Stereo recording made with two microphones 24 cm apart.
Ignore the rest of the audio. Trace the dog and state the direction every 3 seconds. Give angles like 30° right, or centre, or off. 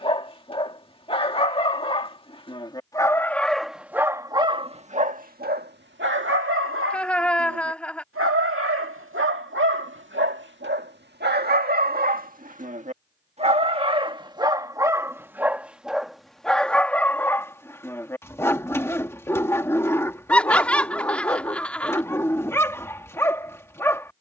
20° left, 20° right, 60° right, 50° right, 20° right, centre, 10° left, 10° left.